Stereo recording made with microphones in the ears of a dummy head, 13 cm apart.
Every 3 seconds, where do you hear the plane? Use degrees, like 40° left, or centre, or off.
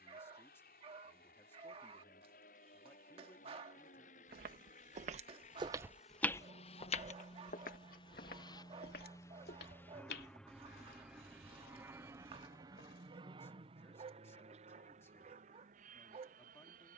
70° left, 60° left, 40° left, centre, 30° right, 50° right.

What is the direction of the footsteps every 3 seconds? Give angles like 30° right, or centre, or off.
off, 40° right, 50° left, 80° left, 80° left, off.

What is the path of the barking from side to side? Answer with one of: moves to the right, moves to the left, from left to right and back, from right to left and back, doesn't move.
doesn't move.